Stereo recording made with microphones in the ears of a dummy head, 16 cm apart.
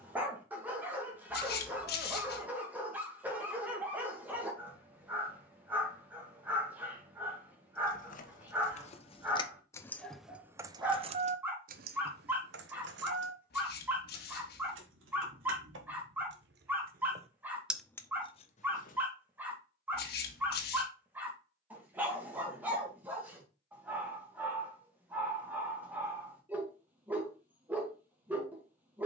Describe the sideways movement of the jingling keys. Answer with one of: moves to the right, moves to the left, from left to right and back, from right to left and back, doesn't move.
from left to right and back.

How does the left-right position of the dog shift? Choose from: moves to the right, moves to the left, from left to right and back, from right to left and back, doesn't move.
doesn't move.